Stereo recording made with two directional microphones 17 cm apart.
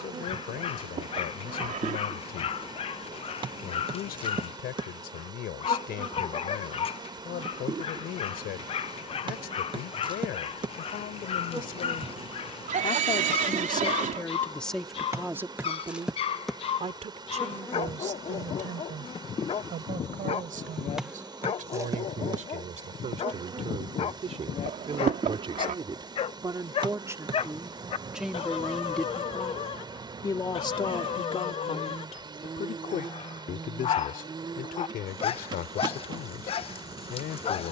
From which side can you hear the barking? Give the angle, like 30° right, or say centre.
40° left.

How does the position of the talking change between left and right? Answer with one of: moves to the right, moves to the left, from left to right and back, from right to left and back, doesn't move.
from left to right and back.